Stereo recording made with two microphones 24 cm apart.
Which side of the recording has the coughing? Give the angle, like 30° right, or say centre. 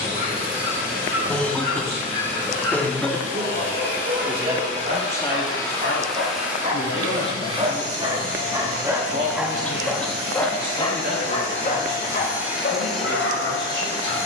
10° left.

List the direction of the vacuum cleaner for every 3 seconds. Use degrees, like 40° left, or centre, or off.
30° left, 30° left, 20° right, 40° right, 10° left.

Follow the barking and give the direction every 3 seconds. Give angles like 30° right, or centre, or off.
50° right, 40° right, 30° right, 10° left, 50° left.